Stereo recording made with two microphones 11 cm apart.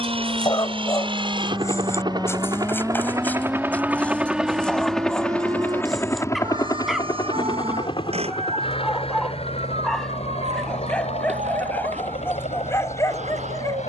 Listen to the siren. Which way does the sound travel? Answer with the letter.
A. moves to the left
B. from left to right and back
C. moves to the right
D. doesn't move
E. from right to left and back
C.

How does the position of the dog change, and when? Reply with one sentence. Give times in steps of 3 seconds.
In this clip you hear the dog on the left from 0 s, in the centre from 3 s and on the left from 12 s.